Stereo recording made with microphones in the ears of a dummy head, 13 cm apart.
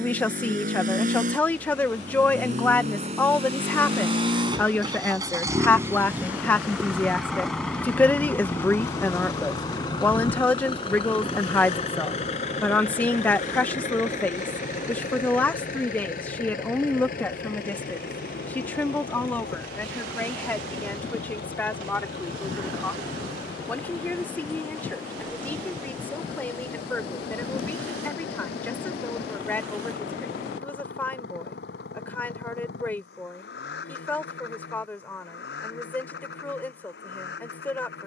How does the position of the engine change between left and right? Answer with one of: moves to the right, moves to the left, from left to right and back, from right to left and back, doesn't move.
moves to the left.